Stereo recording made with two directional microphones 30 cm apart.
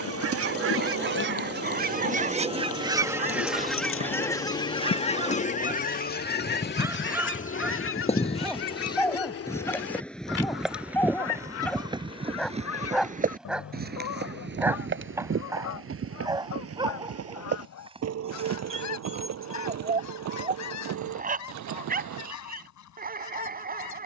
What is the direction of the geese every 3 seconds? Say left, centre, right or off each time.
right, centre, left, left, left, left, left, left.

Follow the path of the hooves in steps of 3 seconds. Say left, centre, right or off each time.
left, left, left, centre, right, right, right, right.